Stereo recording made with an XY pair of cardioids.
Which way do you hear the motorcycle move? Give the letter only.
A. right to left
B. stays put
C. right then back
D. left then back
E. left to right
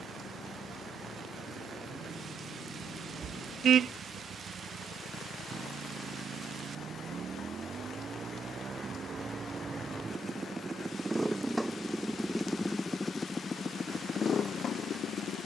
A.